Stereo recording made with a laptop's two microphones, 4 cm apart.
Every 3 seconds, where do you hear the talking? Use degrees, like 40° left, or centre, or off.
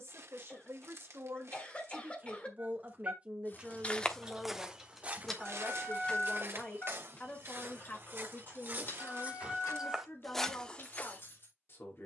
50° right, 10° right, 40° left, 50° left.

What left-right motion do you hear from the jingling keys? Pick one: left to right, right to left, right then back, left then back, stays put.
right to left.